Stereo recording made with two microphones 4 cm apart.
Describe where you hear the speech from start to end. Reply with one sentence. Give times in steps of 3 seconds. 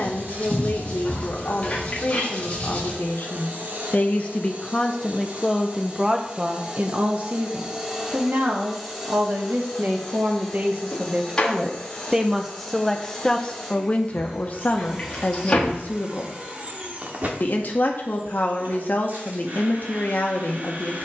In this clip you hear the speech on the left from 0 s, on the right from 6 s and on the left from 12 s.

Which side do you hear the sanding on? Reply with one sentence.
In this clip you hear the sanding on the left.